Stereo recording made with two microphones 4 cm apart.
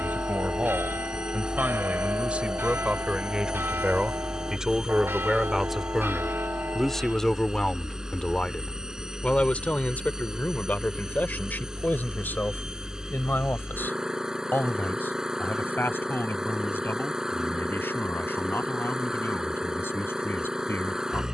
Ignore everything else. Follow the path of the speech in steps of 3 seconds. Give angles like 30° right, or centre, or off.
40° right, 20° right, 10° left, 40° left, 60° left, 70° left, 80° left.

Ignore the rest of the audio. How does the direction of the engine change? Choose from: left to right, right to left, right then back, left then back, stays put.
stays put.